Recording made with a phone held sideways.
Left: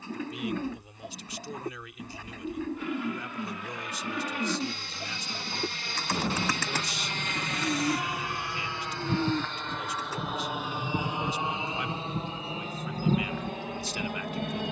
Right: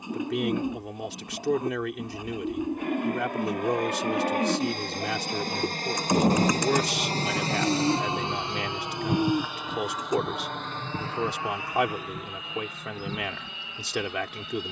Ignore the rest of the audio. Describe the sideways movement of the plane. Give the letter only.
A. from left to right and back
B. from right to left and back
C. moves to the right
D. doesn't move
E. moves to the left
E.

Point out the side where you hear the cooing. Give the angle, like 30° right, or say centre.
20° right.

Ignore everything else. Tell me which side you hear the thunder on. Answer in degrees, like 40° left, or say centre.
40° right.